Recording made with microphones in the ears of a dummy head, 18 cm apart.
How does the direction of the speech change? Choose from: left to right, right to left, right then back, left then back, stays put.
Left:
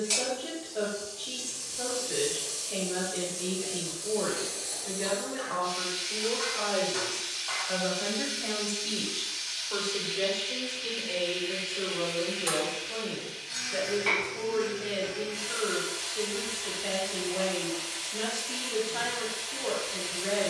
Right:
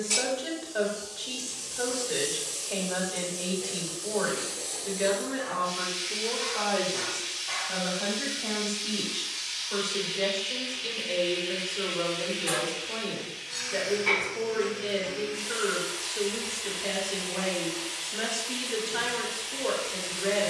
left then back.